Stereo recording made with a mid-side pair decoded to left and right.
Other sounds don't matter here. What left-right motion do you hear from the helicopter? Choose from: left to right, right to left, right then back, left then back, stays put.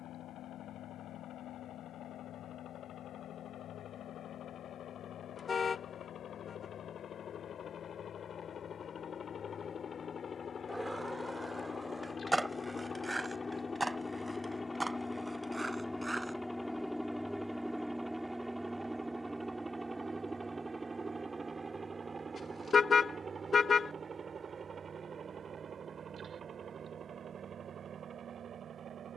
left to right.